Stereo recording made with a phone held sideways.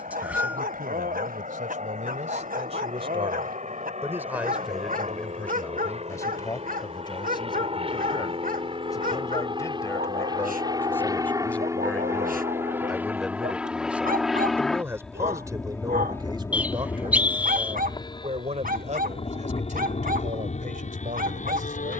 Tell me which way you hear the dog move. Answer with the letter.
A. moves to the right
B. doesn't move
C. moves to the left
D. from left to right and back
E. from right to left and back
B.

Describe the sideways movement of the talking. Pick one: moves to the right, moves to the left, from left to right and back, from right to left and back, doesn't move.
from right to left and back.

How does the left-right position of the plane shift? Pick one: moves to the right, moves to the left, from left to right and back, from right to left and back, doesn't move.
moves to the left.